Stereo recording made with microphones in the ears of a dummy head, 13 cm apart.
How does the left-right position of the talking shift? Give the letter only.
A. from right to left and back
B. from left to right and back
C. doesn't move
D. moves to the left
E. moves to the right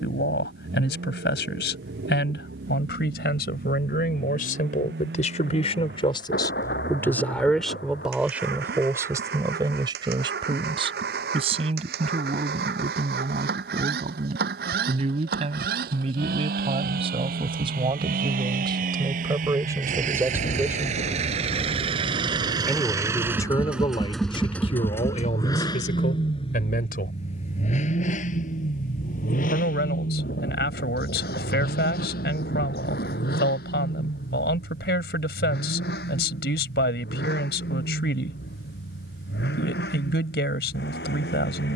B.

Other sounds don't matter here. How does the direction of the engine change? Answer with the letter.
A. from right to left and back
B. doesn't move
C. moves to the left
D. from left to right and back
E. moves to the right
C.